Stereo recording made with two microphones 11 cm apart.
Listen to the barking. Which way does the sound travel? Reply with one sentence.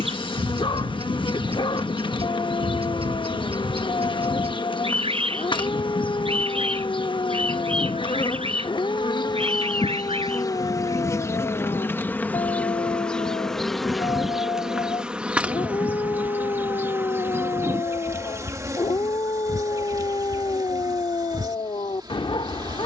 In this clip you hear the barking stay put.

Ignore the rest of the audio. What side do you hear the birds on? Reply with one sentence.
You can hear the birds on the right.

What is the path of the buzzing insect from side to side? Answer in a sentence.
You can hear the buzzing insect travel towards the right.